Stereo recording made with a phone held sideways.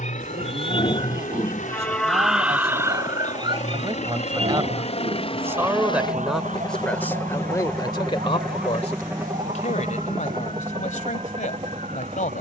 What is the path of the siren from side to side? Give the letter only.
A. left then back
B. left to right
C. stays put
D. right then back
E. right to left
B.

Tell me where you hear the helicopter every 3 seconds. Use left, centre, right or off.
left, left, centre, right.